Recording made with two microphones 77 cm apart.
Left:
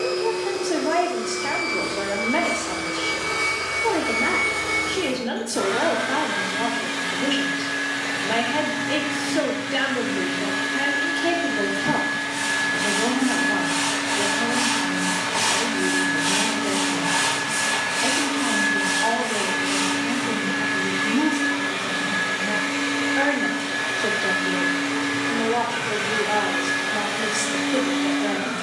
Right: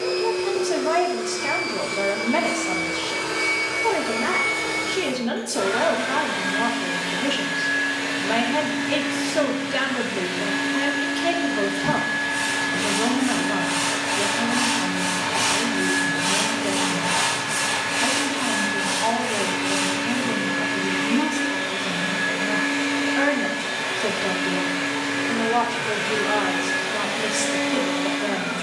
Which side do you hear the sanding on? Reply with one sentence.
You can hear the sanding on the right.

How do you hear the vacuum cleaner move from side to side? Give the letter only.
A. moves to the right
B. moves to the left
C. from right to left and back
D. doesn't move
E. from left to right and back
D.